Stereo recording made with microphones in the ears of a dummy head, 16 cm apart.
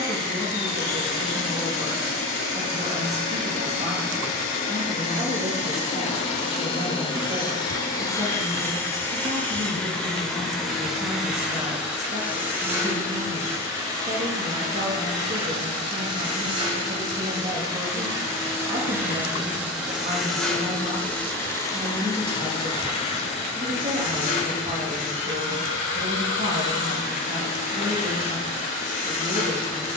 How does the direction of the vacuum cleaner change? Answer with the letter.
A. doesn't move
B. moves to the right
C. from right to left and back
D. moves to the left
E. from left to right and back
E.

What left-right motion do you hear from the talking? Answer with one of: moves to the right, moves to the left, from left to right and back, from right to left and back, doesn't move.
doesn't move.